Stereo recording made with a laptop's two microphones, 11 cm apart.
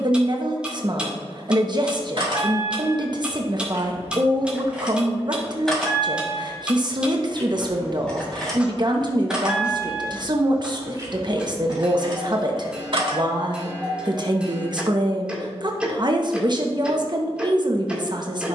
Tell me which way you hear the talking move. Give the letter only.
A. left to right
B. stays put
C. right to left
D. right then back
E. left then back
B.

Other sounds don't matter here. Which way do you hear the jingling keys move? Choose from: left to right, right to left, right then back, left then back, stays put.
left then back.